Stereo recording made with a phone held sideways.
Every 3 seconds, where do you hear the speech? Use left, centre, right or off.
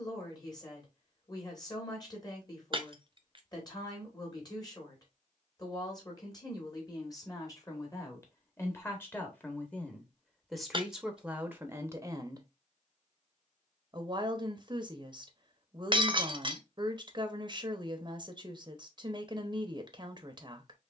left, left, left, centre, right, right, right.